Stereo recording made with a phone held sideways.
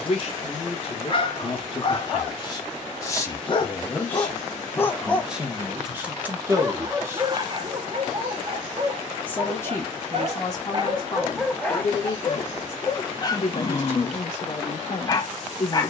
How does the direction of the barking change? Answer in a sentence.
In this clip you hear the barking move from left to right and back again.